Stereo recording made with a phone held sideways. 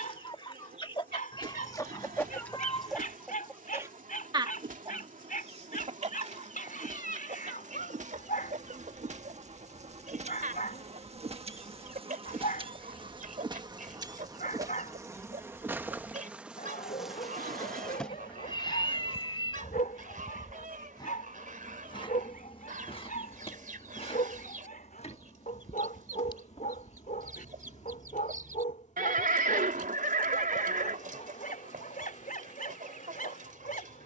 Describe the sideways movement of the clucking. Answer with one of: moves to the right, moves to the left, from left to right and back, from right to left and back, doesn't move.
moves to the right.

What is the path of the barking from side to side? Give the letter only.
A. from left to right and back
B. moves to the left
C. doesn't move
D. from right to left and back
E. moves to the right
C.